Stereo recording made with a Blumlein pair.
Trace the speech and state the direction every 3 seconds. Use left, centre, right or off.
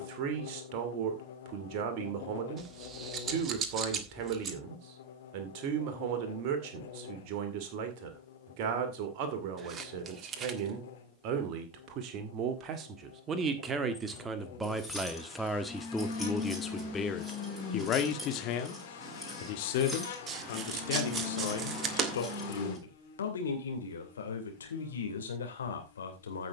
right, right, right, right, right, centre, left, left, left.